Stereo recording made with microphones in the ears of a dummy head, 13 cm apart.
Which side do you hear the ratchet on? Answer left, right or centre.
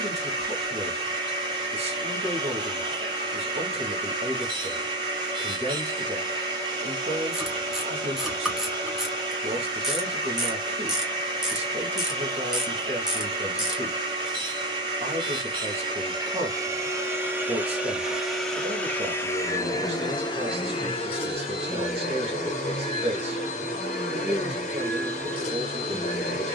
centre.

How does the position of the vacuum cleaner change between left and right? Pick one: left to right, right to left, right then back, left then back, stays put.
right to left.